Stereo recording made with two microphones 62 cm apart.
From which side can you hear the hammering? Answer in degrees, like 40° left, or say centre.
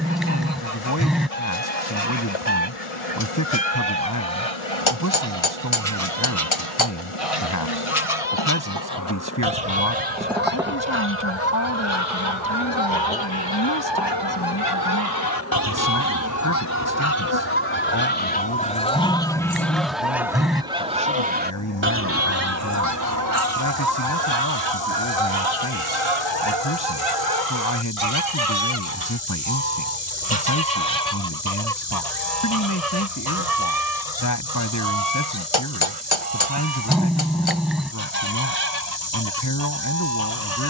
50° left.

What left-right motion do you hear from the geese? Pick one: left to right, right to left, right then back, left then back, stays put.
left to right.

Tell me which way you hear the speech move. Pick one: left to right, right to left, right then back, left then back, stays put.
stays put.